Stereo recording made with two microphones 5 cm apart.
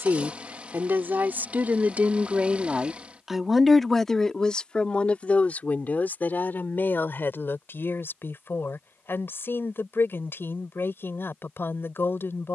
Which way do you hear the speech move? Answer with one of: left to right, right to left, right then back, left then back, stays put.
right to left.